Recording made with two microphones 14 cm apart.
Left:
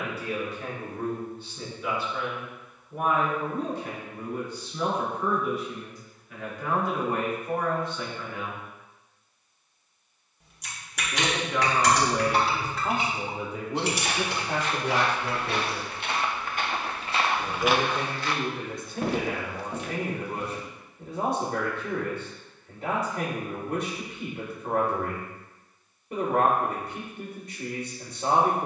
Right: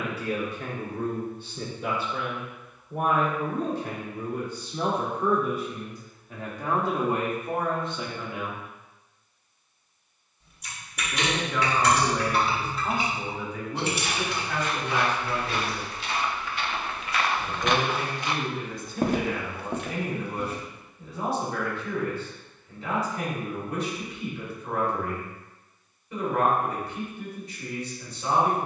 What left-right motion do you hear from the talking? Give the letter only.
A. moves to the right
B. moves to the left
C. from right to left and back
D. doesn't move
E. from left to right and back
B.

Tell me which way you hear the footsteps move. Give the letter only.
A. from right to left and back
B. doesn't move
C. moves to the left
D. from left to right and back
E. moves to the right
E.